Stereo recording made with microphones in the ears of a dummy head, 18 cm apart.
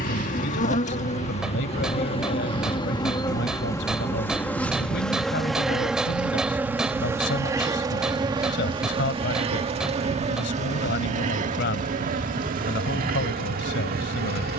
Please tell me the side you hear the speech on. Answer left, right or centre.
left.